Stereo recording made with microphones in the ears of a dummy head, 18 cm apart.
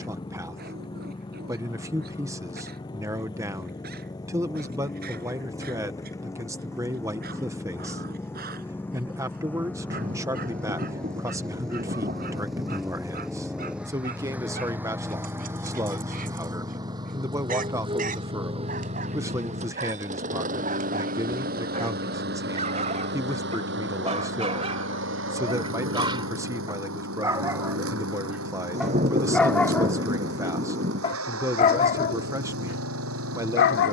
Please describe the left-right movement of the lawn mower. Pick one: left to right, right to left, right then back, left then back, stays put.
left to right.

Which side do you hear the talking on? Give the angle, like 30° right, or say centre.
20° right.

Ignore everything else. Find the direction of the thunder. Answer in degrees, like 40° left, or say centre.
30° right.